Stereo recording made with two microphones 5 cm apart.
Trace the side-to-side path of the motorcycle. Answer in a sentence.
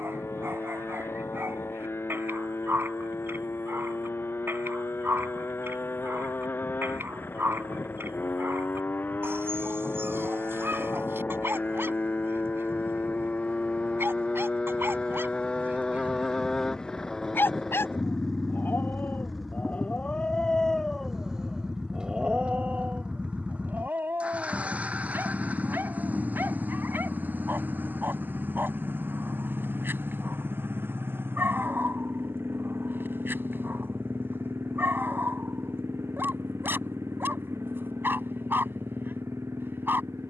You can hear the motorcycle travel towards the right.